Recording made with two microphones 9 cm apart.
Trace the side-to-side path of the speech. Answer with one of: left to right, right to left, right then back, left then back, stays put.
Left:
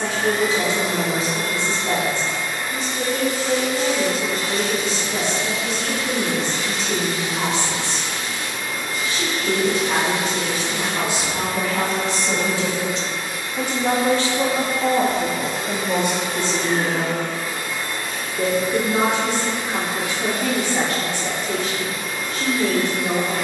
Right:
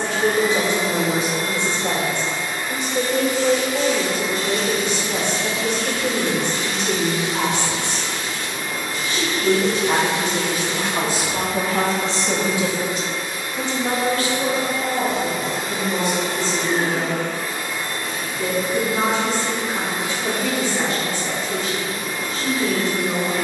right to left.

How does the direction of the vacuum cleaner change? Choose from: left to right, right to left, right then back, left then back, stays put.
stays put.